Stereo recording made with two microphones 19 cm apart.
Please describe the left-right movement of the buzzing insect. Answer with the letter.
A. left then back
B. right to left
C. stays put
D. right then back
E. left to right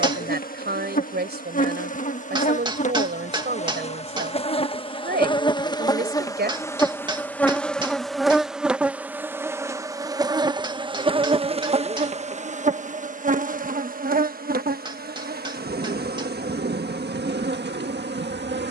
E.